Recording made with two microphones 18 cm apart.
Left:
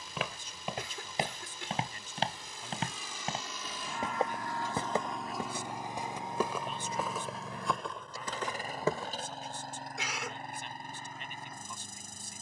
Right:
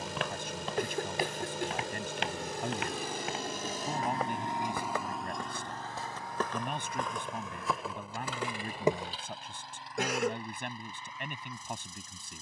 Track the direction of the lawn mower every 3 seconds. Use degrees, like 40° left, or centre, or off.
70° right, 20° right, 40° left, 50° left.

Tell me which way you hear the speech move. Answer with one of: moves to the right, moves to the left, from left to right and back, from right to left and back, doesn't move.
doesn't move.